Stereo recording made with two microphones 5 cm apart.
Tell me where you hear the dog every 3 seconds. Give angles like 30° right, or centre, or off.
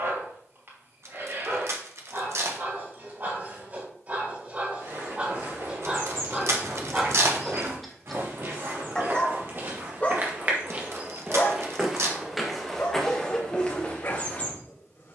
50° right, 40° right, 10° right, 30° left, 50° left.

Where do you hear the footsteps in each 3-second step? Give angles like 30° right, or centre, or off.
off, 80° right, 70° right, 40° right, 10° left.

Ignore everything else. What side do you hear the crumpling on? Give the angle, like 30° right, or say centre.
70° right.